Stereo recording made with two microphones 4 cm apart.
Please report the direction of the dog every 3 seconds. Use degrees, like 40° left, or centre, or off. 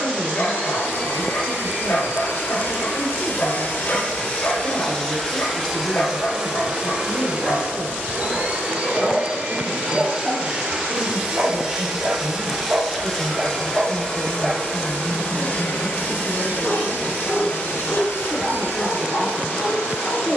60° left, 60° left, 50° left, 20° right, 20° right, 30° left, 50° left.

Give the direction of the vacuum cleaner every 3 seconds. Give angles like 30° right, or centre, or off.
70° left, 30° left, 30° right, 20° right, 10° left, 50° left, 70° left.